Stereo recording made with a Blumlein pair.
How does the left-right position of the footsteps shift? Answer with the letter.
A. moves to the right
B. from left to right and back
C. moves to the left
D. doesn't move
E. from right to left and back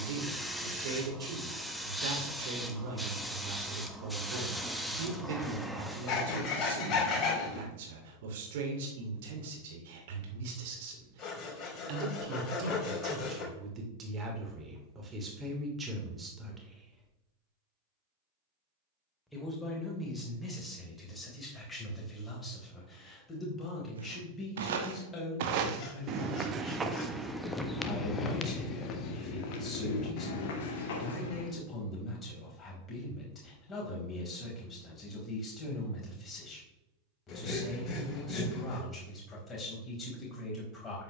C.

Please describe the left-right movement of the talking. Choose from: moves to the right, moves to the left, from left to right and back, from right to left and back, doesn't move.
moves to the left.